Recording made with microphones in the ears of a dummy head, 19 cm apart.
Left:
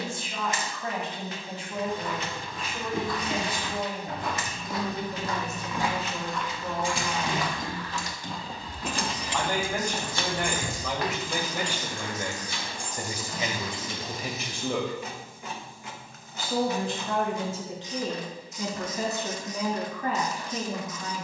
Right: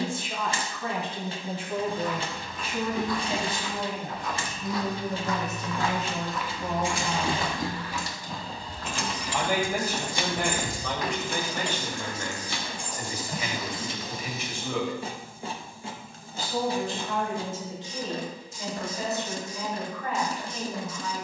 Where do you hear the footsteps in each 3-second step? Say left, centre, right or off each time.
left, left, centre, left, left, off, off.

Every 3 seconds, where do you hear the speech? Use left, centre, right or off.
right, right, right, centre, left, left, left.